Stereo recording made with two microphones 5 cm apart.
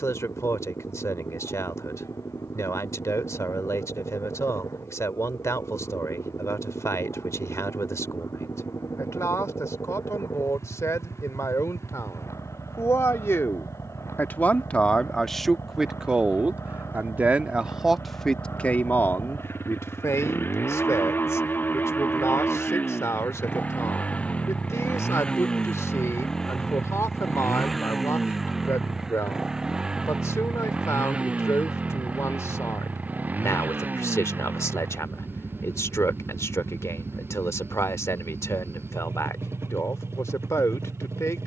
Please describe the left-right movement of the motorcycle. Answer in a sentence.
You can hear the motorcycle move to the right.